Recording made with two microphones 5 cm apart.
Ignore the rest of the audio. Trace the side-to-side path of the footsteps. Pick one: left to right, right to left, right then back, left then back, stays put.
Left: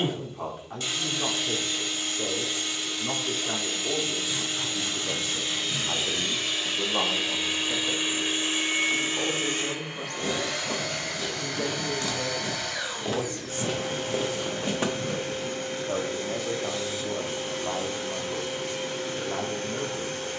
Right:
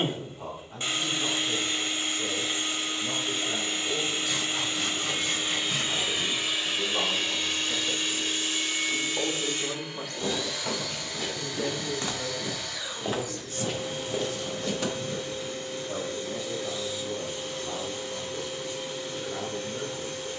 right to left.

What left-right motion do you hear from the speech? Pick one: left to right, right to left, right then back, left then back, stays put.
right then back.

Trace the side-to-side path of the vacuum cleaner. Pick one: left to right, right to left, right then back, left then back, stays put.
right to left.